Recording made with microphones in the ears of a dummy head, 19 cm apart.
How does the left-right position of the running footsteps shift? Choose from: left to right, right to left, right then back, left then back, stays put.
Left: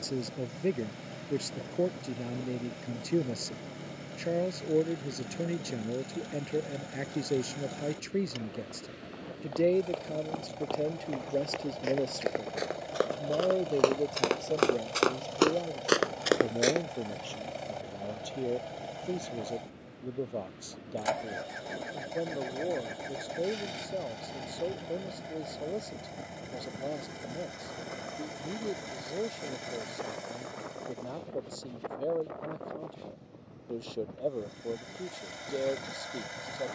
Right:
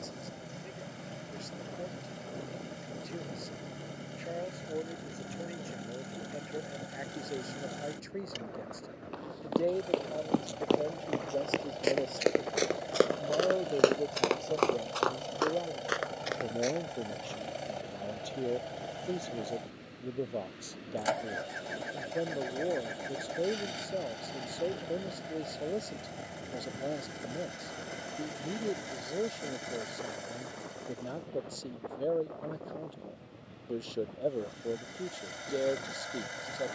right to left.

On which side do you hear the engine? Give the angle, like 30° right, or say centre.
centre.